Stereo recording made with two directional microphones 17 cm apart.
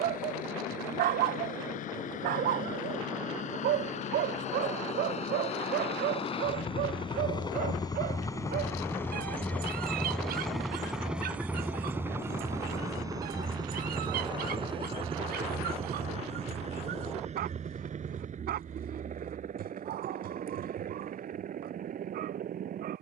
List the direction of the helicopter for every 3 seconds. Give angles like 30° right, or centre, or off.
60° left, 50° left, 30° left, centre, 20° right, 40° right, 50° right, 50° right.